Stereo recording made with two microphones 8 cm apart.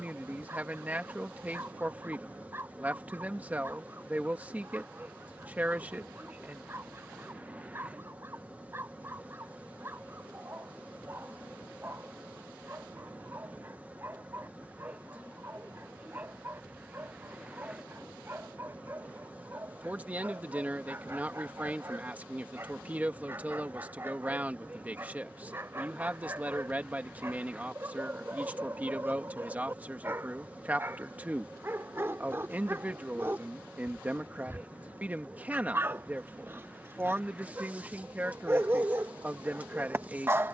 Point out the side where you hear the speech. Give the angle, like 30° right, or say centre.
20° right.